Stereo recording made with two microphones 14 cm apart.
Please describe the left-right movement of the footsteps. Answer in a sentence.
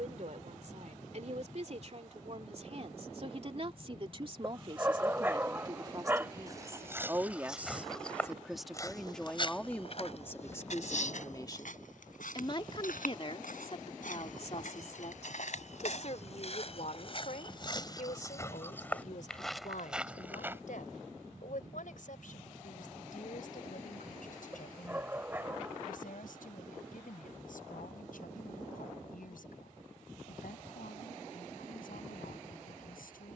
You can hear the footsteps go left and come back.